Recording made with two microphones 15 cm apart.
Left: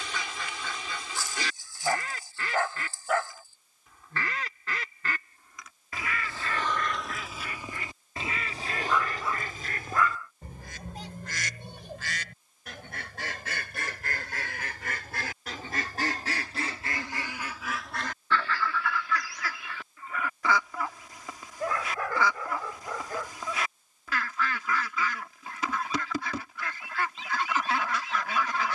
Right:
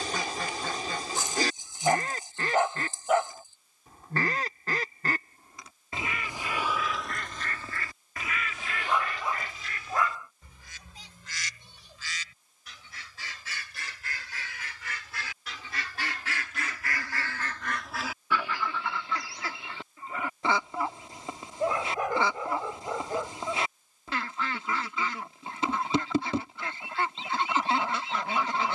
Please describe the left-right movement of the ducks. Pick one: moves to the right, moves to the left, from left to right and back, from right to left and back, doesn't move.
from right to left and back.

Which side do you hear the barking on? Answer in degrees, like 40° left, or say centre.
20° right.